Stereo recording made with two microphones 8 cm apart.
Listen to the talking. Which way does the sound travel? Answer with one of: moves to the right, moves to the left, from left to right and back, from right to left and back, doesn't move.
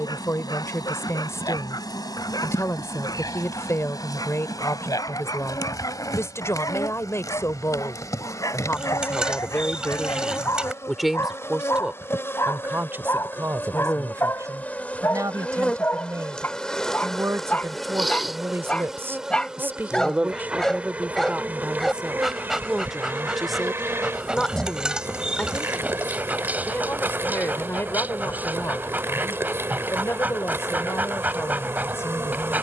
from left to right and back.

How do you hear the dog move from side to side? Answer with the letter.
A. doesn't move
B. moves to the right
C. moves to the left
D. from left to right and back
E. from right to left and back
B.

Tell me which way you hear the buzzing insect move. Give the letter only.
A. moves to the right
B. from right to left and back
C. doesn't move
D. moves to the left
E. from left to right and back
A.